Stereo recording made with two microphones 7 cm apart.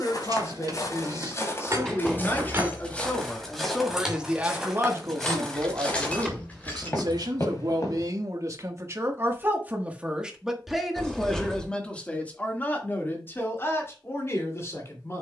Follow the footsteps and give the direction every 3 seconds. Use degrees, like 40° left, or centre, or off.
40° left, centre, 40° left, off, off.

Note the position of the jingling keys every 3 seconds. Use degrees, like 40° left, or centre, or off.
40° right, centre, 20° left, off, off.